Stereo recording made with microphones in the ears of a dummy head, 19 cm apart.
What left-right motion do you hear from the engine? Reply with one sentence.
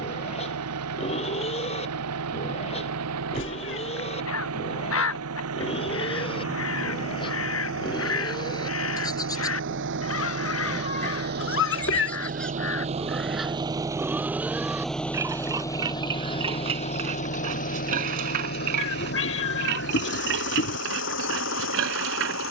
You can hear the engine move from right to left.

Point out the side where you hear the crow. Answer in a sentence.
You can hear the crow on the left.